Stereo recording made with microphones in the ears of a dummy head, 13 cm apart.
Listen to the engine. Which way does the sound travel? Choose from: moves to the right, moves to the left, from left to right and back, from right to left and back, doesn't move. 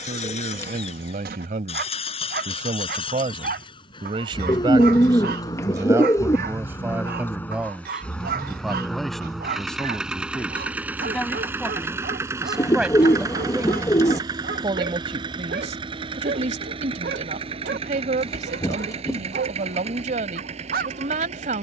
moves to the right.